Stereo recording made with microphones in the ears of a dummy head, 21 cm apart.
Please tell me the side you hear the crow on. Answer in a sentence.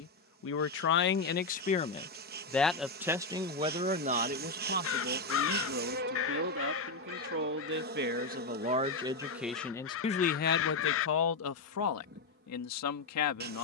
You can hear the crow on the left.